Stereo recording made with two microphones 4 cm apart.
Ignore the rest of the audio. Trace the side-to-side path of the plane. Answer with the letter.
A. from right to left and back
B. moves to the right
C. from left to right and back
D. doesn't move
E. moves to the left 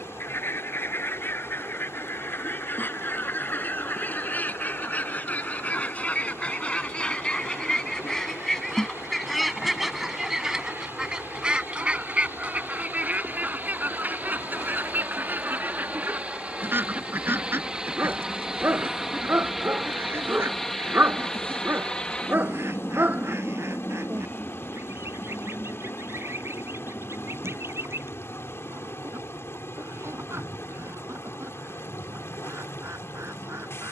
E.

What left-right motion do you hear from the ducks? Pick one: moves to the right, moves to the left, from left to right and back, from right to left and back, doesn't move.
moves to the right.